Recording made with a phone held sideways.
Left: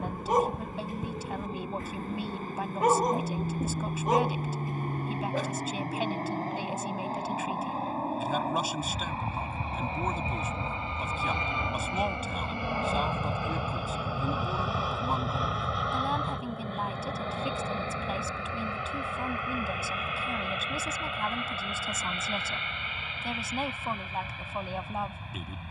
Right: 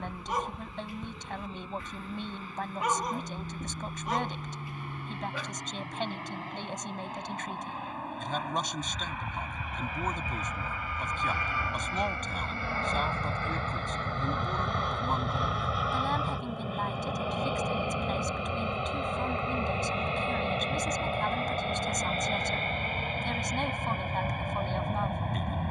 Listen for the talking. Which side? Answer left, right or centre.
centre.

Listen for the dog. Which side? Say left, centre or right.
left.